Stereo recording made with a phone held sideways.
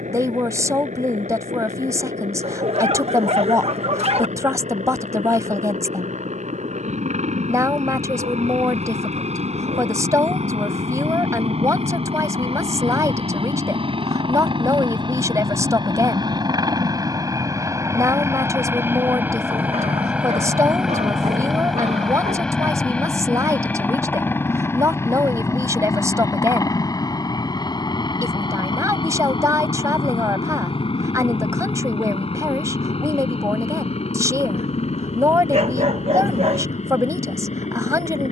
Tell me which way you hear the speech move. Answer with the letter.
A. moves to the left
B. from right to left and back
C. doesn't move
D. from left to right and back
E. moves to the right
C.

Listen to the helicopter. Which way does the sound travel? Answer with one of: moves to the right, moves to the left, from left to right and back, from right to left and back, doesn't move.
moves to the left.